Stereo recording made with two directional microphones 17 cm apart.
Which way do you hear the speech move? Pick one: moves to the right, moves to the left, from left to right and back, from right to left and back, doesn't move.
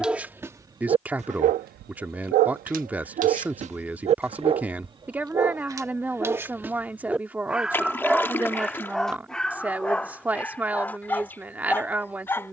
doesn't move.